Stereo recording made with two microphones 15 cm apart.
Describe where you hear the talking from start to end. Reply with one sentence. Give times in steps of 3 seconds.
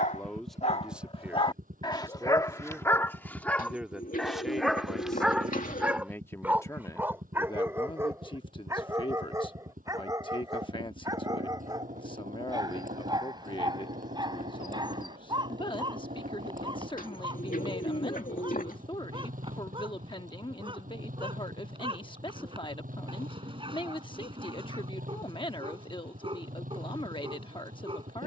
You can hear the talking in the centre from 0 s and on the left from 6 s.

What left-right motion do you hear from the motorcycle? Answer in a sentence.
In this clip you hear the motorcycle stay put.